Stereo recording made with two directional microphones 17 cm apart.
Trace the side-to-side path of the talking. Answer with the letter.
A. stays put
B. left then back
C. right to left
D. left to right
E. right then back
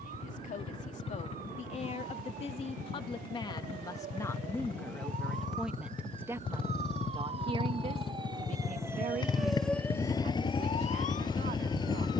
D.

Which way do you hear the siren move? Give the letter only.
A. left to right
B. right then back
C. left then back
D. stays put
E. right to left
E.